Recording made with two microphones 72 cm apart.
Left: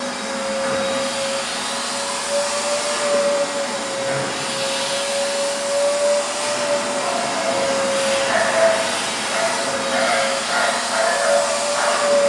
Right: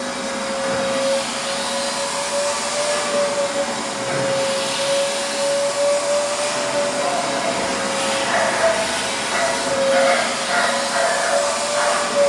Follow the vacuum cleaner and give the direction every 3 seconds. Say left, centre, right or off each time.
right, right, centre, left.